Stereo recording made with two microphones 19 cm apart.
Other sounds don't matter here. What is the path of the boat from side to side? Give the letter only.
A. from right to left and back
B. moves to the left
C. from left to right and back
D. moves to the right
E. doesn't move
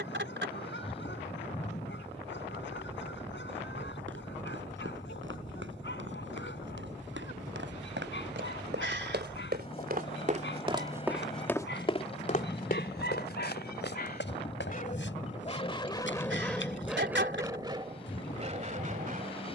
E.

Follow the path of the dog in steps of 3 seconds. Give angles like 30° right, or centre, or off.
70° left, 70° left, 70° left, 70° left, 60° left, 10° left, 40° right.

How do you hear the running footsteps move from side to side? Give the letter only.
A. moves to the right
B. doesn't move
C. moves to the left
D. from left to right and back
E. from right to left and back
C.